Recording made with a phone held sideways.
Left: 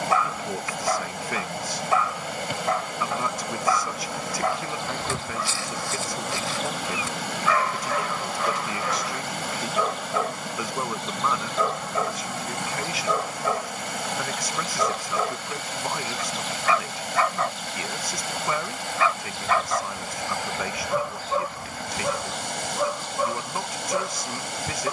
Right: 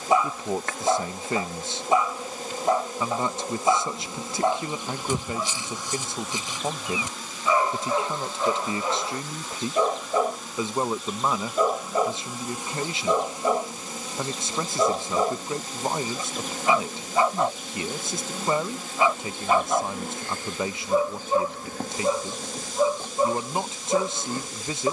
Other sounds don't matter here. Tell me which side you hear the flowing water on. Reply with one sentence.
In this clip you hear the flowing water on the left.